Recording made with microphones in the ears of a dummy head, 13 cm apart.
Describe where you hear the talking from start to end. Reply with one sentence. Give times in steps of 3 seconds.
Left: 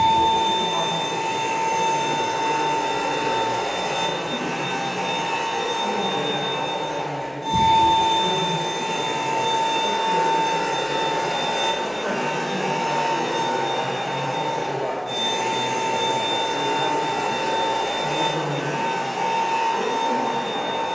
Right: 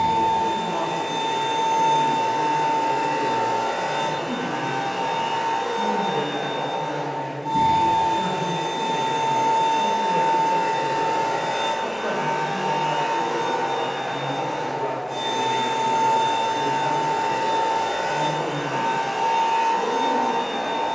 In this clip you hear the talking on the right from 0 s and on the left from 12 s.